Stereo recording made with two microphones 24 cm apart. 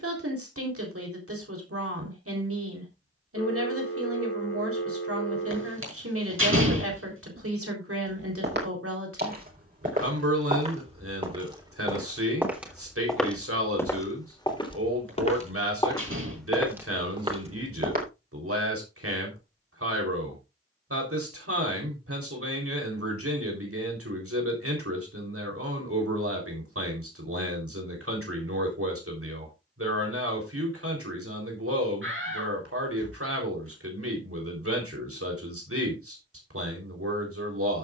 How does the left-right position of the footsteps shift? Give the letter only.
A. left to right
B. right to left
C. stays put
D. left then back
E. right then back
D.